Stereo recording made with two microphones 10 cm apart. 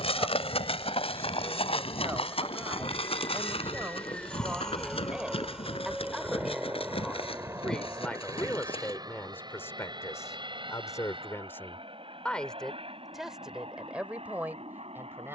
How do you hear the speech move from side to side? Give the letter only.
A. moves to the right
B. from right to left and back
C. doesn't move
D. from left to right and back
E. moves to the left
B.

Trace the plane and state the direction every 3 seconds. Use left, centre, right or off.
left, centre, right, right, right.